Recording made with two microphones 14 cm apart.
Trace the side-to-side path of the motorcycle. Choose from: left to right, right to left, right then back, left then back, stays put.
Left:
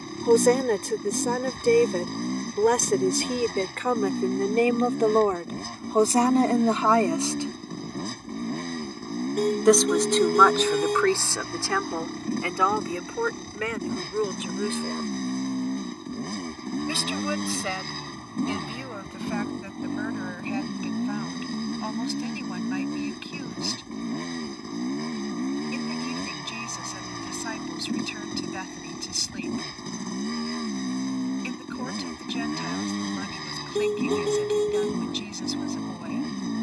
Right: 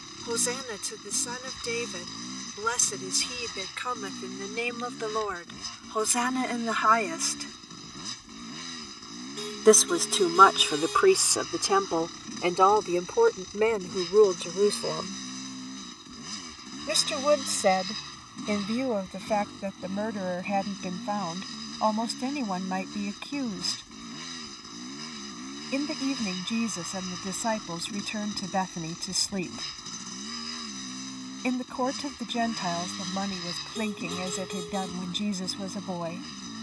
stays put.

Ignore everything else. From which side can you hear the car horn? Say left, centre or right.
left.